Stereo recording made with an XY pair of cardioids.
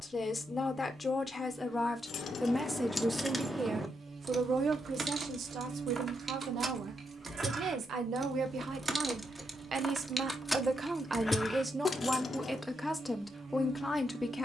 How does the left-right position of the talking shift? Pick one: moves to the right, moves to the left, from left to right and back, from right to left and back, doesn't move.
from left to right and back.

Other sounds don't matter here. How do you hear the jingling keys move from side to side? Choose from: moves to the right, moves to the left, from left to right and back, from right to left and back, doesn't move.
from left to right and back.